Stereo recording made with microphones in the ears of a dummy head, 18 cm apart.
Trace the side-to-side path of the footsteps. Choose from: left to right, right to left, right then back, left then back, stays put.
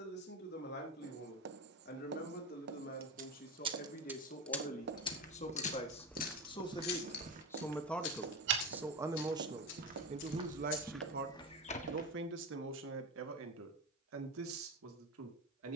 right then back.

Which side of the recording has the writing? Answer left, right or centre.
right.